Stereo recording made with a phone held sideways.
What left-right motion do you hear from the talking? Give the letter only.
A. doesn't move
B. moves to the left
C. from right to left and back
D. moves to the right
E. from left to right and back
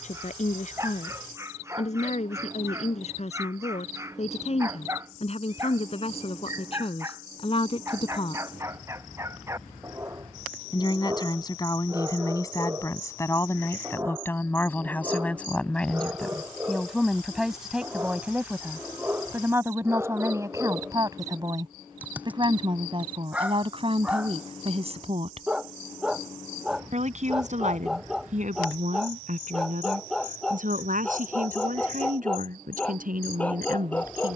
D.